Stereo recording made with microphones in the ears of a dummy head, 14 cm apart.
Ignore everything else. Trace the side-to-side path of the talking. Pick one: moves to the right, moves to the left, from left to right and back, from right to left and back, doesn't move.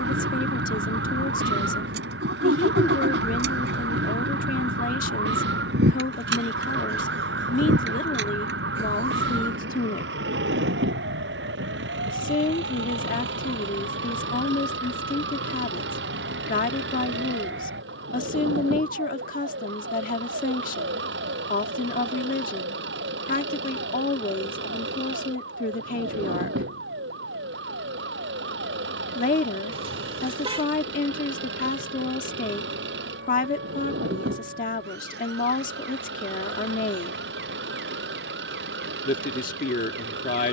doesn't move.